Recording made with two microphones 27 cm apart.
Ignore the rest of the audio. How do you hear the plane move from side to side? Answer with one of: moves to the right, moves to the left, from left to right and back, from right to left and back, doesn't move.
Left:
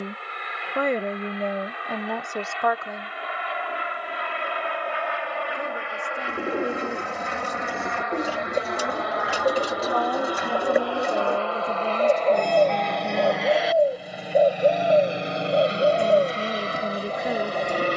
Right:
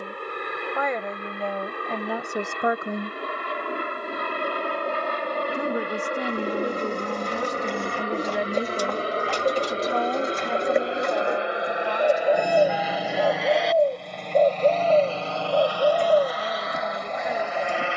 moves to the left.